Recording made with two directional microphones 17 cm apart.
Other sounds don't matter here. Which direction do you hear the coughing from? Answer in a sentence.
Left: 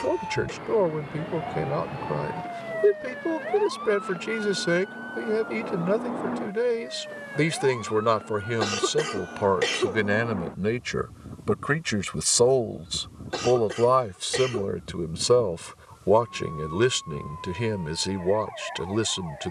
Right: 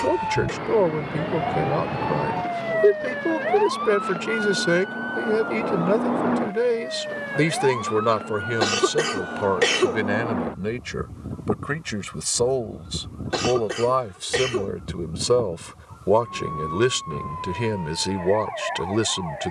You can hear the coughing on the right.